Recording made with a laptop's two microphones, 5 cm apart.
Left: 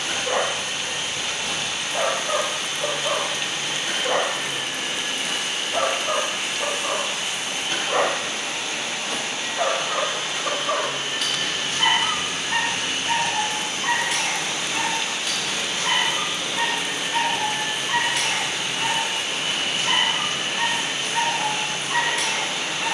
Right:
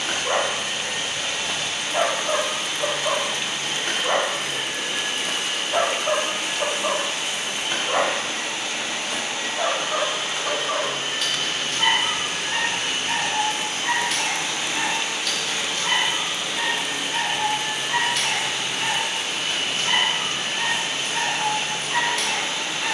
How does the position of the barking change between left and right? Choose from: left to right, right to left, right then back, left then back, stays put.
right to left.